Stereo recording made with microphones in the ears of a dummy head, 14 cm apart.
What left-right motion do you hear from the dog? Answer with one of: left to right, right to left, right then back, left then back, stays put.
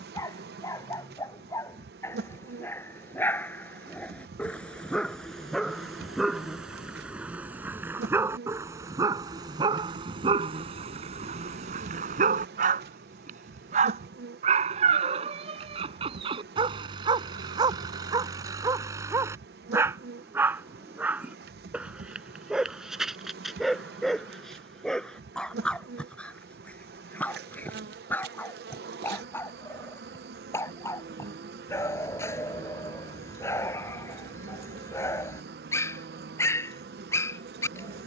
right then back.